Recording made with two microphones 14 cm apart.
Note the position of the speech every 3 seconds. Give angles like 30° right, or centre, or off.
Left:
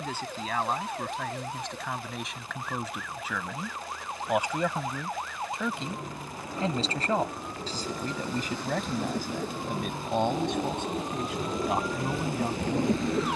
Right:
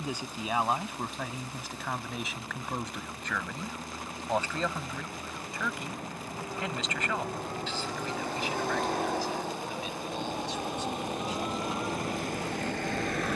10° right, 10° left, 40° left, 60° left, 60° left.